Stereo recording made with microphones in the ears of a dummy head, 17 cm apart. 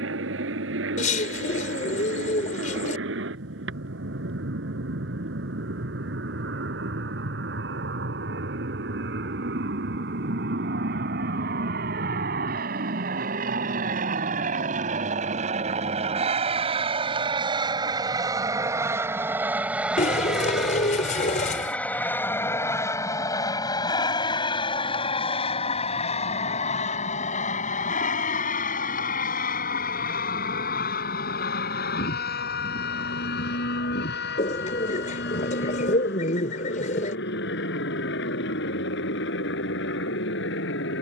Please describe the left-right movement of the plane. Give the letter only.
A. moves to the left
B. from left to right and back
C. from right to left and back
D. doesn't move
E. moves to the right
A.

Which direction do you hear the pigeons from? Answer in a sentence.
In this clip you hear the pigeons on the left.